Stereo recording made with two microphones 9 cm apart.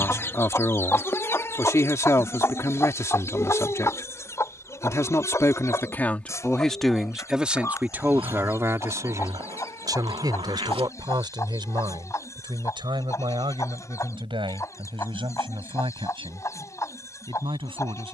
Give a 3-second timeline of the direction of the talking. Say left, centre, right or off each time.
left, left, centre, right, right, right.